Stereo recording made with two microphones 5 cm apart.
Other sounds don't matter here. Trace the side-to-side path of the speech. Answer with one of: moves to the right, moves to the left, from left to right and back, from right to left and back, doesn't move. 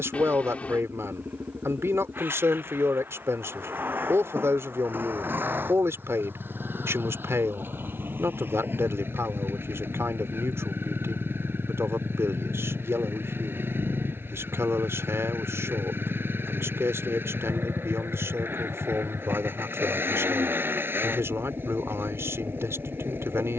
doesn't move.